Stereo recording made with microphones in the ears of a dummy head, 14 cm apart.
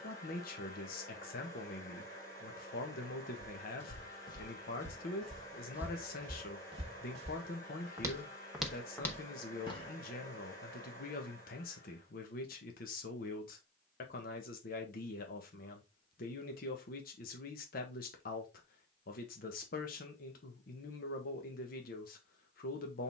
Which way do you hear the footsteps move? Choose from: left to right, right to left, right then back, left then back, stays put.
right then back.